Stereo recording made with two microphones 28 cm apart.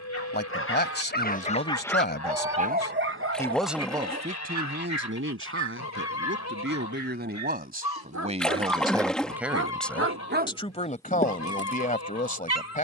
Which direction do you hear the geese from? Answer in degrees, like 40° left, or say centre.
70° left.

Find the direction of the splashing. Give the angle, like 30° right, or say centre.
centre.